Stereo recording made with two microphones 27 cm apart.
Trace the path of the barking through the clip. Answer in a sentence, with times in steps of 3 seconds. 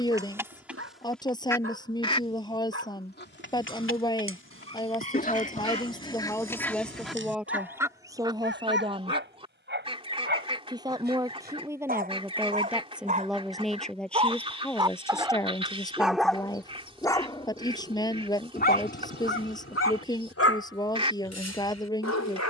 In this clip you hear the barking on the right from 0 s, in the centre from 15 s and on the left from 18 s.